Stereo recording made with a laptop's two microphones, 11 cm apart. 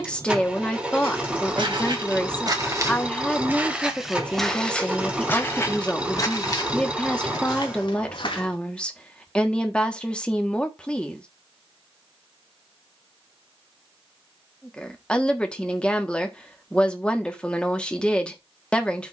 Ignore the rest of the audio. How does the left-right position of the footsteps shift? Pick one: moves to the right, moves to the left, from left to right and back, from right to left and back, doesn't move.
moves to the left.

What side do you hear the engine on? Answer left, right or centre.
centre.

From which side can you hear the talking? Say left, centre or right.
centre.